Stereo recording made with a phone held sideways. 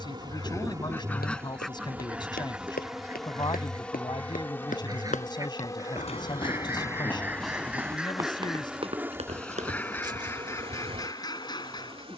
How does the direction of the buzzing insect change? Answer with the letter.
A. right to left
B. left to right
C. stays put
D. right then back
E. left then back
E.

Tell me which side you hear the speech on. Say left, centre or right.
left.